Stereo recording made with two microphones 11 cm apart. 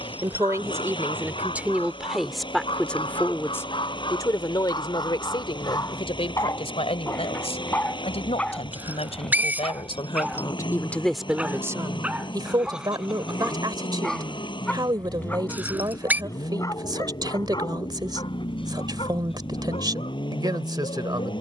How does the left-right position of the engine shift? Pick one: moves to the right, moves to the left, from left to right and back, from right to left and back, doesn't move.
doesn't move.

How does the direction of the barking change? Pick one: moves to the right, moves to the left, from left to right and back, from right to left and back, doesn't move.
from left to right and back.